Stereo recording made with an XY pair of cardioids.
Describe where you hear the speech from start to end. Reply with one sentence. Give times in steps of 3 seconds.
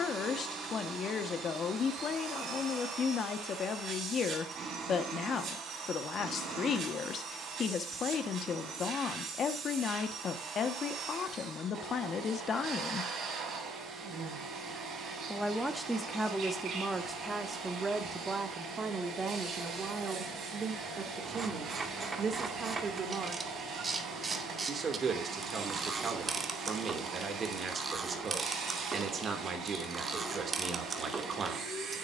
In this clip you hear the speech on the left from 0 s, in the centre from 15 s and on the right from 18 s.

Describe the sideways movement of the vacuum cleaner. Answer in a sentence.
In this clip you hear the vacuum cleaner stay put.